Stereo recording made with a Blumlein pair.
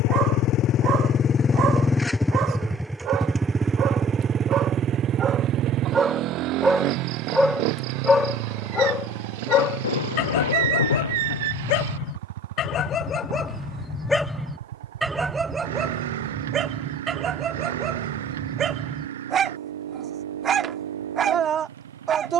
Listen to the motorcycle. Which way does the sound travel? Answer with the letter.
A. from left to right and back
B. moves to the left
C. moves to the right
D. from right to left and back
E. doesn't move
C.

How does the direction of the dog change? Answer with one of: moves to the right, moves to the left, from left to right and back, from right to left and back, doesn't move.
from right to left and back.